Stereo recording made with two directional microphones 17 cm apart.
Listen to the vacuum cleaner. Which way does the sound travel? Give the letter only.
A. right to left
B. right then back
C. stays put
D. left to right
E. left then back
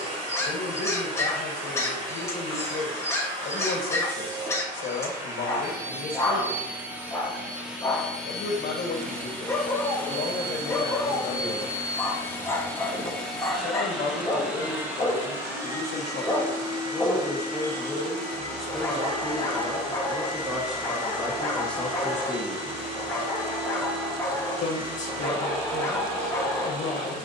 E.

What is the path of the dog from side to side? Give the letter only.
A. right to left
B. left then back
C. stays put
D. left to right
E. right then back
C.